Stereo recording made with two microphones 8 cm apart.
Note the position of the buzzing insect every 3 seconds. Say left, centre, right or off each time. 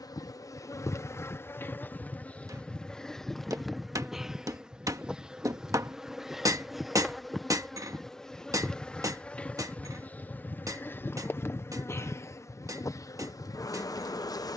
left, centre, centre, left, left.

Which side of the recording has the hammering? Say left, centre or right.
right.